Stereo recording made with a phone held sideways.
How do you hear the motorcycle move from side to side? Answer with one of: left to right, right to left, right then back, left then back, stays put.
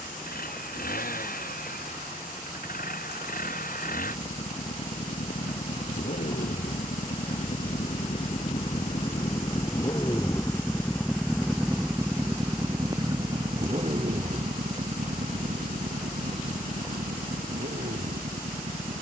left to right.